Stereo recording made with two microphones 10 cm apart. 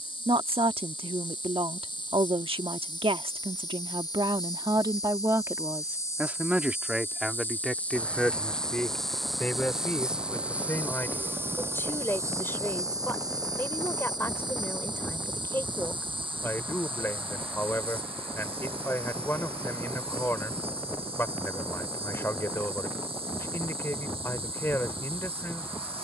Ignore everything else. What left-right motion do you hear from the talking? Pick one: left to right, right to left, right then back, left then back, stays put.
right to left.